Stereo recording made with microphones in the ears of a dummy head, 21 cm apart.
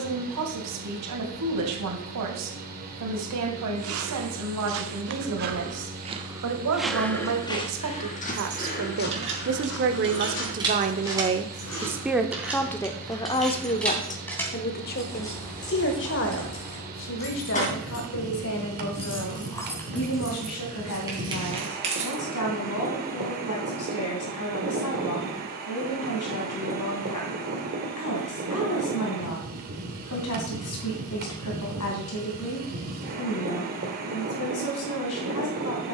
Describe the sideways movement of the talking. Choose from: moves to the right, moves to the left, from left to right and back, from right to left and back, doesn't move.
moves to the left.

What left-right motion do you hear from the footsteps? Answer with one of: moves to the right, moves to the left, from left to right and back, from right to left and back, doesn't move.
moves to the left.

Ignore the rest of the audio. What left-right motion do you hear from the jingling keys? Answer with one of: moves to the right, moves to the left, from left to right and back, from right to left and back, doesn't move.
from right to left and back.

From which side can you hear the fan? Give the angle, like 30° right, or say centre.
40° right.